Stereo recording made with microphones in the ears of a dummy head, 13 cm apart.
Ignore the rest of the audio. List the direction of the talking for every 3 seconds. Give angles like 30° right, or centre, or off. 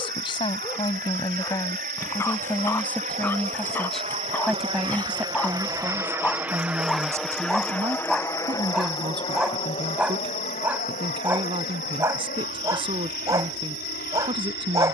20° left, centre, 20° right, 30° right, 40° right.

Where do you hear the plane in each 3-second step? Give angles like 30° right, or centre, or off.
60° right, 40° right, 10° left, 40° left, 60° left.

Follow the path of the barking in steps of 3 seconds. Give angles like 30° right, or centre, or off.
20° left, 10° left, centre, 10° right, 20° right.